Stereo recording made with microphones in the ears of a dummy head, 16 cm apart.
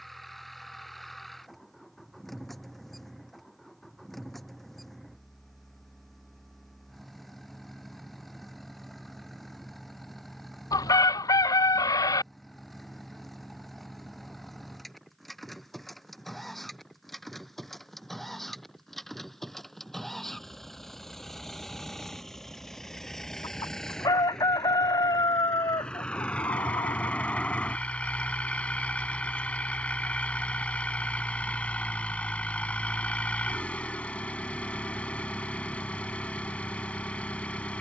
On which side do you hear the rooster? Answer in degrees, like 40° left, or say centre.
20° left.